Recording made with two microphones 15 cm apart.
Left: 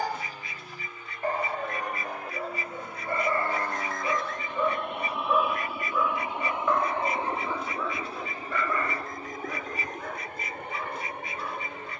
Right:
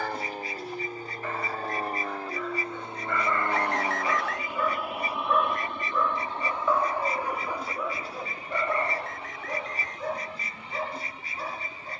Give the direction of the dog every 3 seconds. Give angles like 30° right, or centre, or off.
40° left, 20° left, 10° right, 40° right.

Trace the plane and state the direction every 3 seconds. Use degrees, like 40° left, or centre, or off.
40° right, 10° right, 20° left, 50° left.